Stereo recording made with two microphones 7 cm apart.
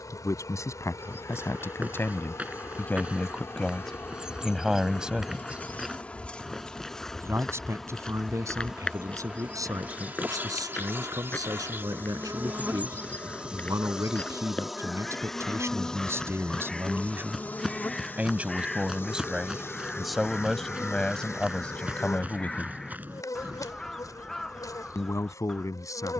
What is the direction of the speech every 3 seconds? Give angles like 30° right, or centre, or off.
40° left, centre, 40° right, 50° right, 50° right, 40° right, 10° right, 20° left, 50° left.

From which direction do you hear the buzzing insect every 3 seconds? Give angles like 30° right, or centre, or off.
50° left, 30° left, centre, 30° right, 20° right, 10° left, 40° left, 50° left, 50° left.